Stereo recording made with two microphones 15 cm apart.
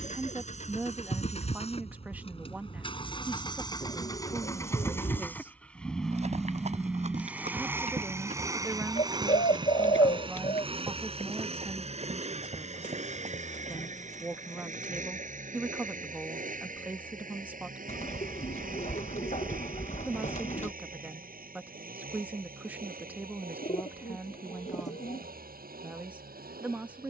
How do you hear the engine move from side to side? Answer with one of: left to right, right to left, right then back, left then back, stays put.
left to right.